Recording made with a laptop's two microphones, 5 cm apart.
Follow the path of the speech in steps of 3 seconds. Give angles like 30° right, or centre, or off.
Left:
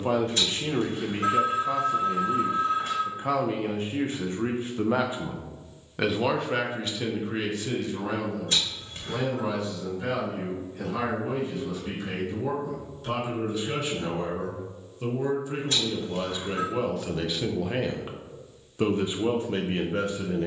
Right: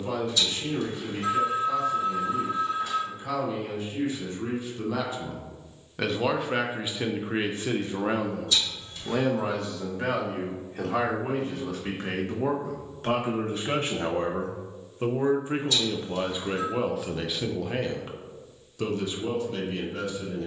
40° left, 40° left, 30° right, 60° right, 50° right, 20° right, 30° left.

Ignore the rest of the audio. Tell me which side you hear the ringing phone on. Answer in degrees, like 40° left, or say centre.
40° left.